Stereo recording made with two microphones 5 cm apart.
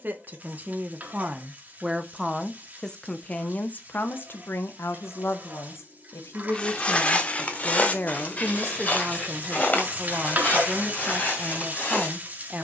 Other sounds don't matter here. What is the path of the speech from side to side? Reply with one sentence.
In this clip you hear the speech go left and come back.